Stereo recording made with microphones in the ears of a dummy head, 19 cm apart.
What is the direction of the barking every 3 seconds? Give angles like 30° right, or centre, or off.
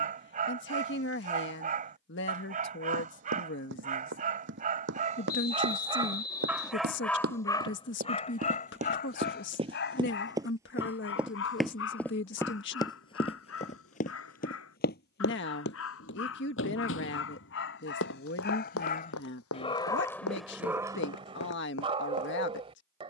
40° right, 40° right, 20° left, 60° left, 70° left, 70° left, 20° left, 30° right.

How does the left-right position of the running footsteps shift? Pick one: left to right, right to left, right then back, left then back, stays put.
right to left.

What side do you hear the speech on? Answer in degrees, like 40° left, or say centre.
60° left.